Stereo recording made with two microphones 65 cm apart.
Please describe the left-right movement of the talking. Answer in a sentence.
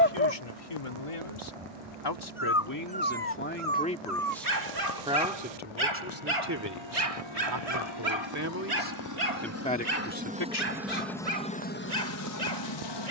You can hear the talking move from left to right and back again.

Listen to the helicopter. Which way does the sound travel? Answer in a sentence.
You can hear the helicopter go from the right side to the left.